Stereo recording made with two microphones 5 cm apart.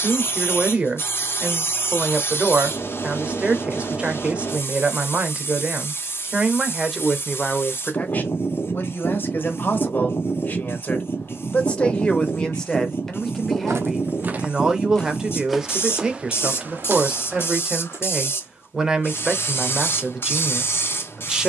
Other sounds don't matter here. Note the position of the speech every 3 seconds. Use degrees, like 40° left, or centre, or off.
20° right, 20° right, 10° left, 40° left, centre, 10° right, 10° right.